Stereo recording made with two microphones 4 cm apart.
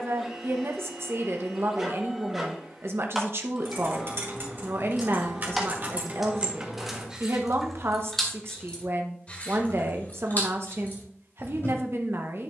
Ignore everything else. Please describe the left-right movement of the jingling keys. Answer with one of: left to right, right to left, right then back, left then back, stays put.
right to left.